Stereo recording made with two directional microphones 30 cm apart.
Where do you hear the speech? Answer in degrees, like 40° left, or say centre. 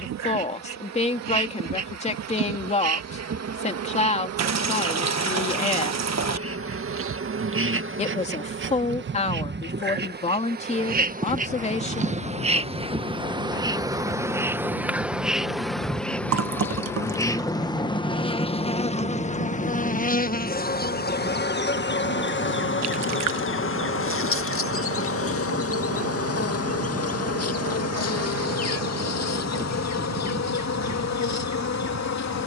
20° left.